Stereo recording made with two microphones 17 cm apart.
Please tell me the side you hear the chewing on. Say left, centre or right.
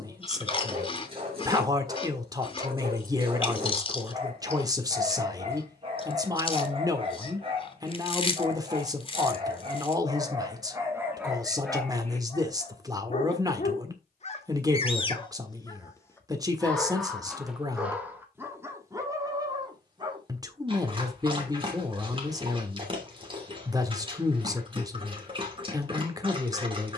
left.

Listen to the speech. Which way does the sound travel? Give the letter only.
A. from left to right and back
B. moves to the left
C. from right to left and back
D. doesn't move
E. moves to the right
D.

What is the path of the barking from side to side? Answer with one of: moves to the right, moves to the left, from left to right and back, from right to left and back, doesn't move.
from right to left and back.